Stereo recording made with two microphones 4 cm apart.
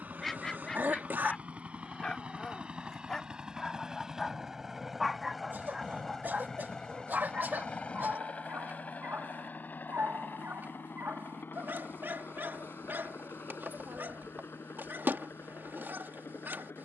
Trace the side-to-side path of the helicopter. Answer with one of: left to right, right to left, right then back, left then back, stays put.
right to left.